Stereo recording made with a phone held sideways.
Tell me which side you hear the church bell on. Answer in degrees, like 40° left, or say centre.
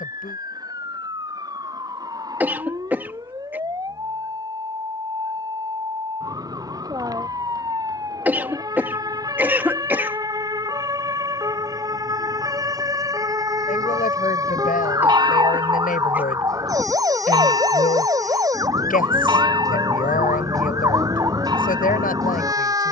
30° right.